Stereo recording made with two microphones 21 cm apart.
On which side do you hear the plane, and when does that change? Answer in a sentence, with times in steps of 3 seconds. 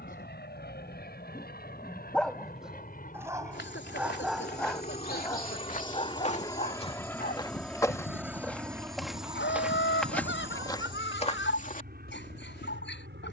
You can hear the plane on the left from 0 s, in the centre from 6 s and on the right from 9 s.